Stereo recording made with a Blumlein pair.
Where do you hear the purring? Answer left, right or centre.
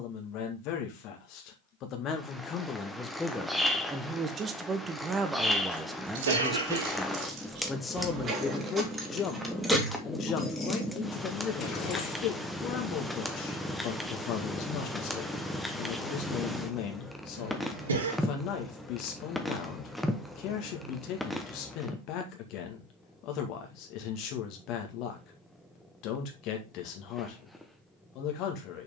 centre.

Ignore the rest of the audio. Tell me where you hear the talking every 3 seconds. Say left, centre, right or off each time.
left, centre, centre, left, left, left, left, left, left, left.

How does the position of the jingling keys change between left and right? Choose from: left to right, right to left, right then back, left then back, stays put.
right to left.